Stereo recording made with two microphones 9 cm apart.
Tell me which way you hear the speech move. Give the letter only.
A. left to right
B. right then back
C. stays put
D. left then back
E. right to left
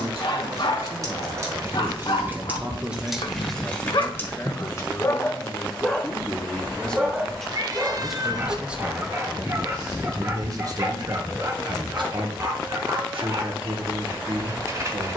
D.